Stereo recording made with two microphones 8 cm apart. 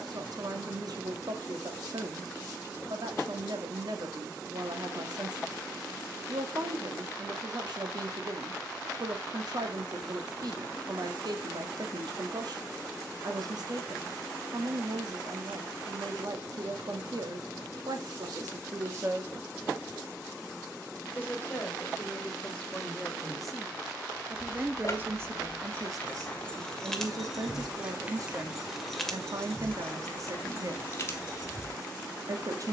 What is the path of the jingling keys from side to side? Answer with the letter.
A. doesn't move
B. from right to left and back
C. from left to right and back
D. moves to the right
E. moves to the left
C.